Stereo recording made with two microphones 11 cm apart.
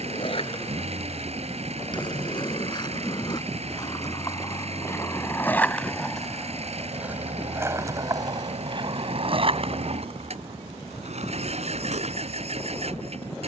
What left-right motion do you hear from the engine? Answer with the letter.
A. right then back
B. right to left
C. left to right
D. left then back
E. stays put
E.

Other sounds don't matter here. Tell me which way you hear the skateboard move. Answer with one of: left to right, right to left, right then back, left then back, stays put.
left to right.